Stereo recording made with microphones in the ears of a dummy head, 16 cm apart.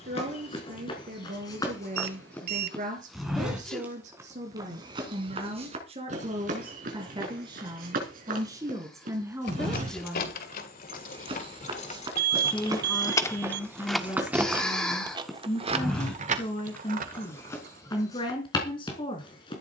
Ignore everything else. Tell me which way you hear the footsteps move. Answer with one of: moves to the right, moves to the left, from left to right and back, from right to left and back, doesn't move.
from left to right and back.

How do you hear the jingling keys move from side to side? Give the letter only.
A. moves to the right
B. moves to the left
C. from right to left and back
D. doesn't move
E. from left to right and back
A.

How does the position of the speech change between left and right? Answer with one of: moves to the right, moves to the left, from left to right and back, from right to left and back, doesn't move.
moves to the left.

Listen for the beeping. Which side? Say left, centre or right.
right.